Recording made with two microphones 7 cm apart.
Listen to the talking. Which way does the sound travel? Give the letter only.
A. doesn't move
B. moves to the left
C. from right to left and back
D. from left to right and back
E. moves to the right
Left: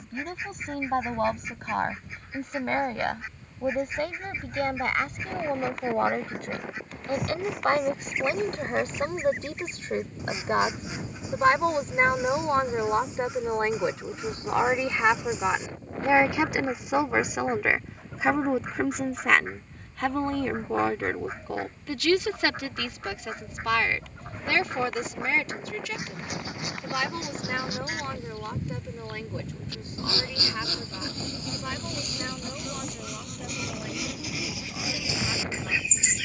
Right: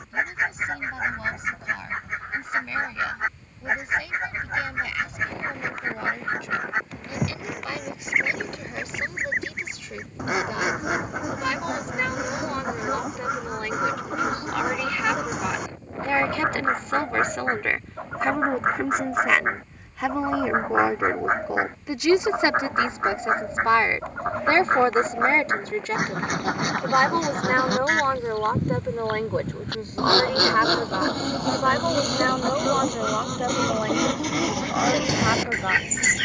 E.